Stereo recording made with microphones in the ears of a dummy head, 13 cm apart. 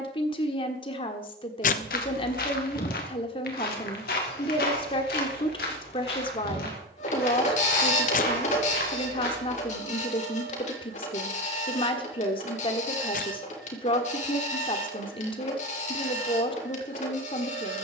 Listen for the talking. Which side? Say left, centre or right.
left.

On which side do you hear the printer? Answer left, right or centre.
left.